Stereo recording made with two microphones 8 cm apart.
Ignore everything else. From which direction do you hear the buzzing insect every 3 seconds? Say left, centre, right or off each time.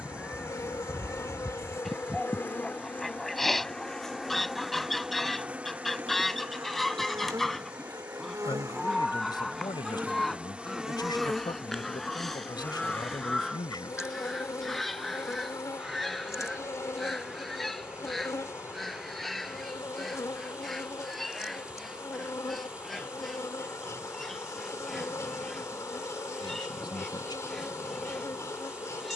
left, centre, right, centre, left, left, left, left, left, left.